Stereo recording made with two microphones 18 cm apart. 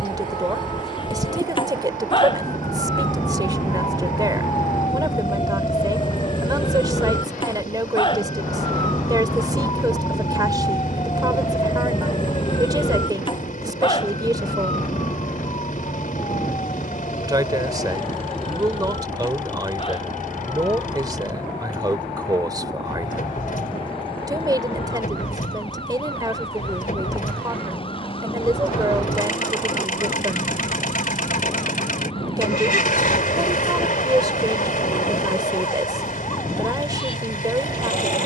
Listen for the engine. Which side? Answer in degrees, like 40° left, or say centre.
50° left.